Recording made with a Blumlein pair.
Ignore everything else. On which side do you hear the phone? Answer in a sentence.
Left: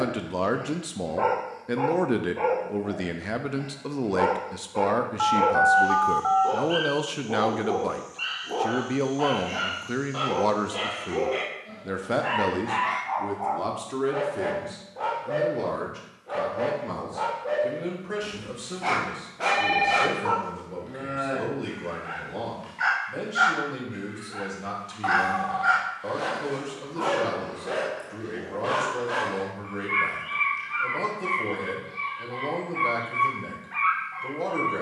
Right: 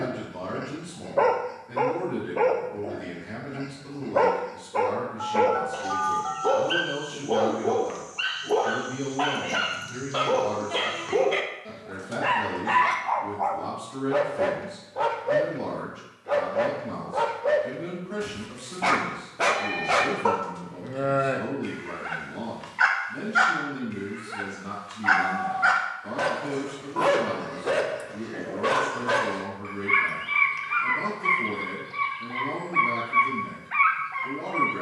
In this clip you hear the phone on the left.